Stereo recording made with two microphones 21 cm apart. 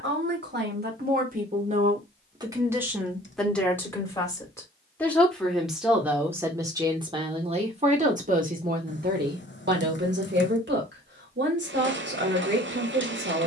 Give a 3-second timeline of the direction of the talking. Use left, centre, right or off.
right, centre, right, right, right.